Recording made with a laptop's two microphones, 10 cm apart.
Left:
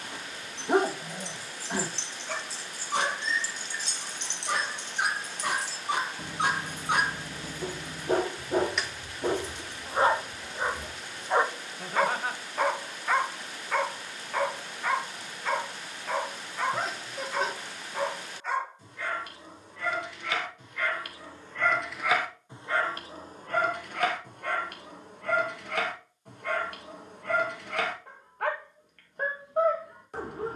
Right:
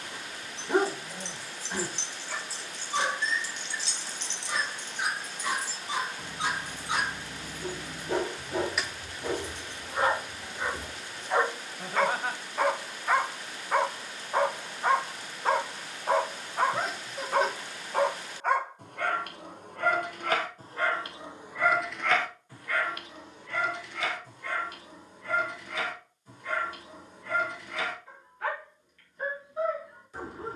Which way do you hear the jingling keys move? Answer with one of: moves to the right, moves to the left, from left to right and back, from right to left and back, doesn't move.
from right to left and back.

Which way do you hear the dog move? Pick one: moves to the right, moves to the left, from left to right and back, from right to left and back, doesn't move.
from left to right and back.